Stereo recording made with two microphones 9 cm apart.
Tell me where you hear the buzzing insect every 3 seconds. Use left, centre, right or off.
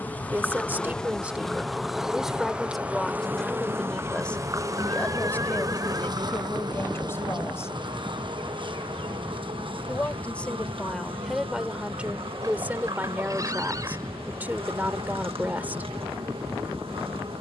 centre, right, right, right, right, right.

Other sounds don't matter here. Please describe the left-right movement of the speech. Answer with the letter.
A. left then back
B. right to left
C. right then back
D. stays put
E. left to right
A.